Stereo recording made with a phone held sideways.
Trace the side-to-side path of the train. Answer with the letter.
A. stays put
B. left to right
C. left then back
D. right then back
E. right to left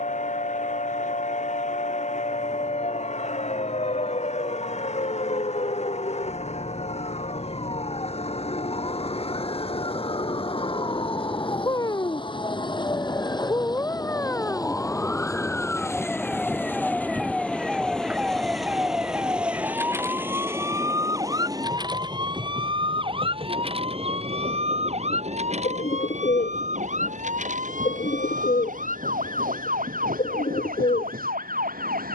B.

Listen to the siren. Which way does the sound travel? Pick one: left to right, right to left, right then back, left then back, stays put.
left to right.